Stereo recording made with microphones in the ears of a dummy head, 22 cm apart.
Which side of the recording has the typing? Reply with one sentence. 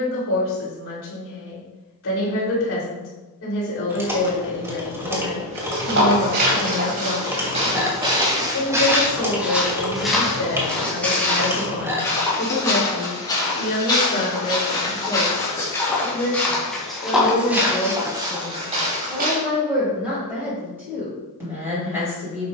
In this clip you hear the typing in the centre.